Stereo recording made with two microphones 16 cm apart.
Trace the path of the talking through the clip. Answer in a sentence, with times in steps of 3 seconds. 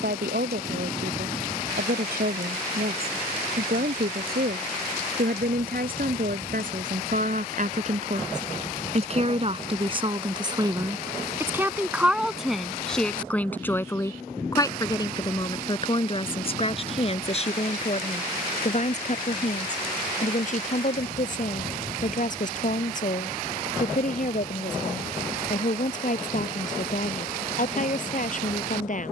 In this clip you hear the talking on the right from 0 s, in the centre from 12 s and on the left from 15 s.